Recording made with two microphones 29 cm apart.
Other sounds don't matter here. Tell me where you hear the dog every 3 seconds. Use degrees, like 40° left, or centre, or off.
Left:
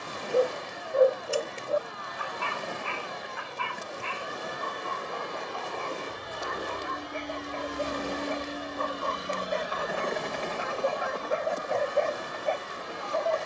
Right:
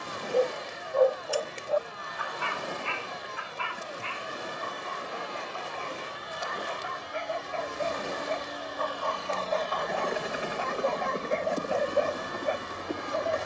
30° left, 60° left, 50° left, 20° left, 20° right.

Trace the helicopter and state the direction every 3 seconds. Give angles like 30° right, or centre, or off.
70° left, 60° left, 40° left, 10° right, 50° right.